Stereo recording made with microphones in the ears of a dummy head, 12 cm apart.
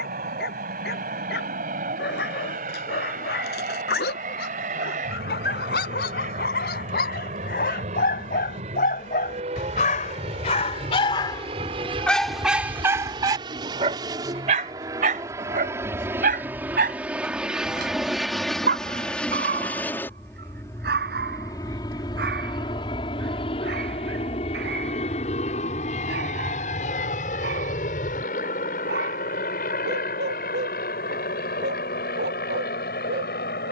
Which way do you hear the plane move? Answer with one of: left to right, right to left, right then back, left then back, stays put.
right to left.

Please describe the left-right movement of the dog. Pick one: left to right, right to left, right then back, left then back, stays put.
left to right.